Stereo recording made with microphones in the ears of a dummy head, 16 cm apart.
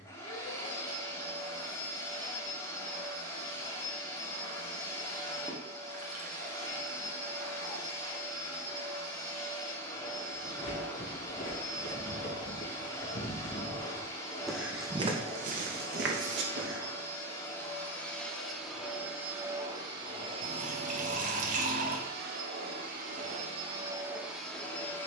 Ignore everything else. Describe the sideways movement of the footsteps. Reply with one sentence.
In this clip you hear the footsteps move from left to right.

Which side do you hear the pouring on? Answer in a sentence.
In this clip you hear the pouring on the right.